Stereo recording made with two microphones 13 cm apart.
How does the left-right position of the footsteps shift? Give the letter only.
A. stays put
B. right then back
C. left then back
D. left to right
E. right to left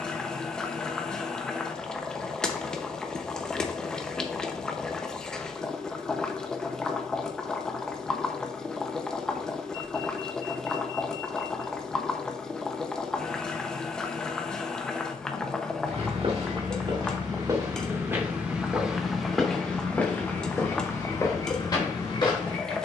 E.